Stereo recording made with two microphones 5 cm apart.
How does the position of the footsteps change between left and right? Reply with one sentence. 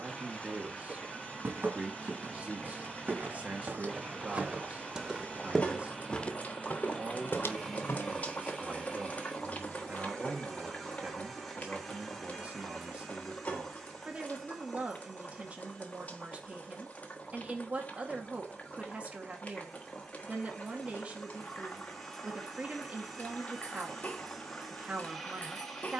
You can hear the footsteps move to the left.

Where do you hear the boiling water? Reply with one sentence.
In this clip you hear the boiling water on the left.